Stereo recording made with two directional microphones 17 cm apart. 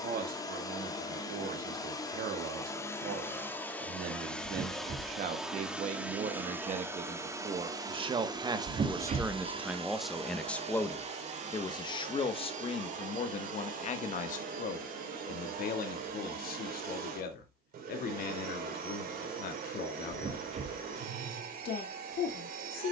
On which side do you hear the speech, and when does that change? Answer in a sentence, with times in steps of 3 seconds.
In this clip you hear the speech on the right from 0 s, in the centre from 9 s and on the left from 12 s.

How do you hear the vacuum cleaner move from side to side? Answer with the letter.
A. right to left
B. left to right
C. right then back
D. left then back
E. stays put
B.